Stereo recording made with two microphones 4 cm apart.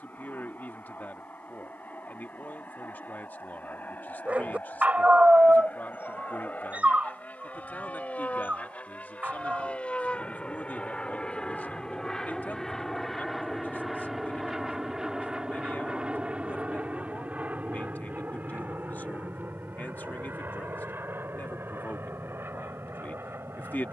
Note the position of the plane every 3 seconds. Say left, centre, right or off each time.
left, left, left, left, centre, right, right, right.